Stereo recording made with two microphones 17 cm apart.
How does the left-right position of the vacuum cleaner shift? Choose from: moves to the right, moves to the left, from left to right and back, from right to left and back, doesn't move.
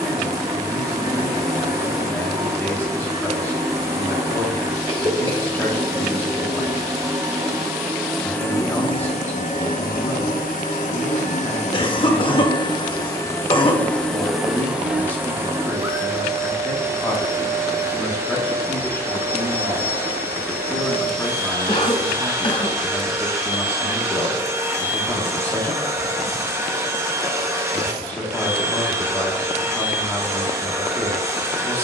from right to left and back.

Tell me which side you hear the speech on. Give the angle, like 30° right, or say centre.
10° left.